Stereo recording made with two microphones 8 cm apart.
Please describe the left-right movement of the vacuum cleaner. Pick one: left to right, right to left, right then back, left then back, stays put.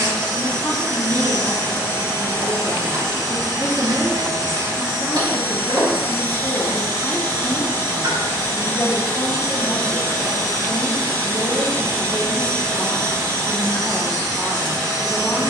stays put.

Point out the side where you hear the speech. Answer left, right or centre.
left.